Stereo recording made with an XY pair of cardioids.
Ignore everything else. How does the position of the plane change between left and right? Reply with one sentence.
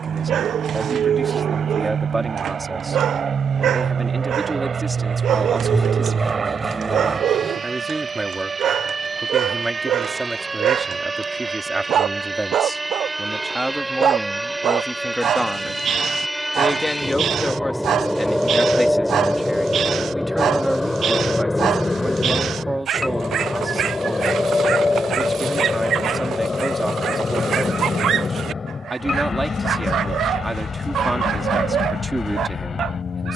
You can hear the plane move from right to left.